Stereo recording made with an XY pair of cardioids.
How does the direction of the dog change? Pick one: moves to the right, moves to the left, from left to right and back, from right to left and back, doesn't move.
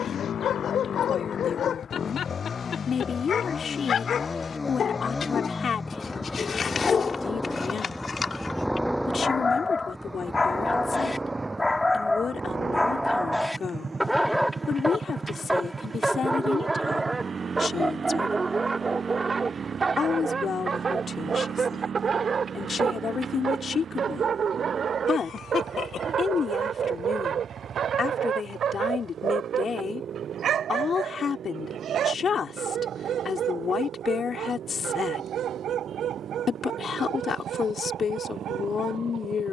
moves to the right.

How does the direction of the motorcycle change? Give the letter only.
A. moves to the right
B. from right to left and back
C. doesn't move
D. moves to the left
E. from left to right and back
A.